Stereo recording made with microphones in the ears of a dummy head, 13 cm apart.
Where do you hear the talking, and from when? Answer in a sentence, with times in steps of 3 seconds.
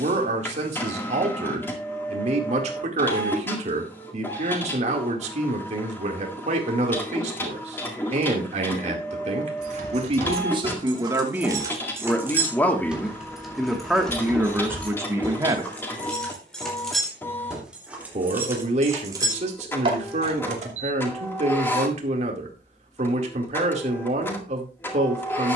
In this clip you hear the talking on the right from 0 s, in the centre from 12 s and on the right from 15 s.